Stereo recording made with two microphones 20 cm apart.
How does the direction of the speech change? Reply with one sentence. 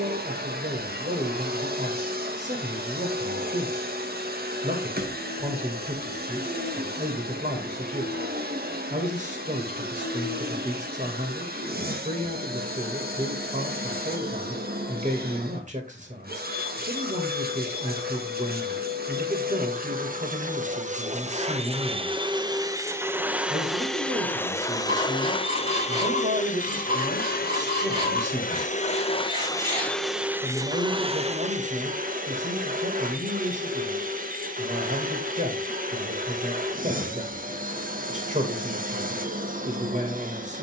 In this clip you hear the speech stay put.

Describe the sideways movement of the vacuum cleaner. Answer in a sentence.
You can hear the vacuum cleaner go left and come back.